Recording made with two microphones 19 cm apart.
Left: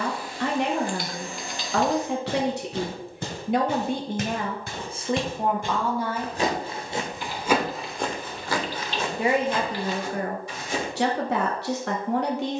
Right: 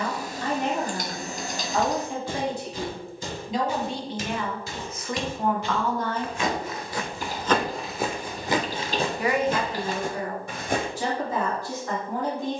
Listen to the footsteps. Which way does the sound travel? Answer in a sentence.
In this clip you hear the footsteps move from left to right.